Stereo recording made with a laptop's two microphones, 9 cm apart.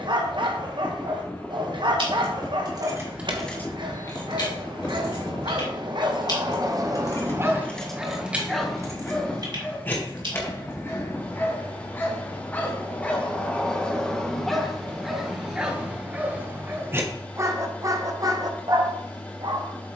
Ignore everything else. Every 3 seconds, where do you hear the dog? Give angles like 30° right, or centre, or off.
60° right, 60° right, 30° right, 20° left, 10° left, 20° right, 50° right.